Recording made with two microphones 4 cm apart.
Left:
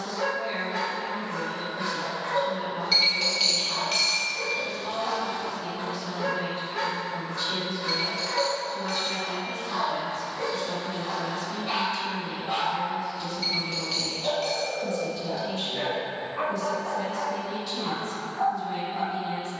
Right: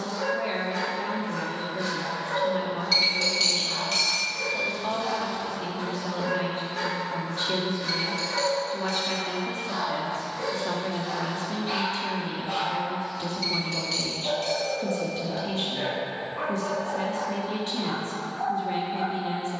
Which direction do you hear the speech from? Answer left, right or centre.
right.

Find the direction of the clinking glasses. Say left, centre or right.
centre.